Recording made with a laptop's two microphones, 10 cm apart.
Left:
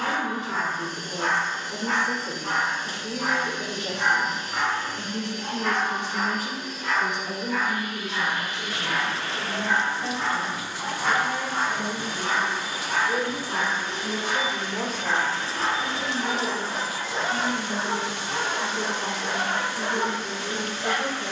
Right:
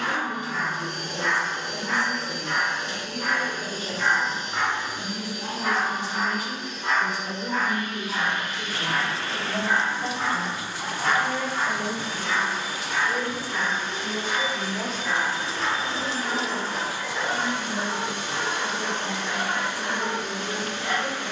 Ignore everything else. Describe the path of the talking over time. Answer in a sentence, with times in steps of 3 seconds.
In this clip you hear the talking on the left from 0 s, in the centre from 6 s, on the right from 9 s and on the left from 12 s.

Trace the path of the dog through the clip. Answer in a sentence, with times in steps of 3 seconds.
In this clip you hear the dog on the left from 0 s, in the centre from 3 s, on the right from 6 s, in the centre from 9 s and on the left from 12 s.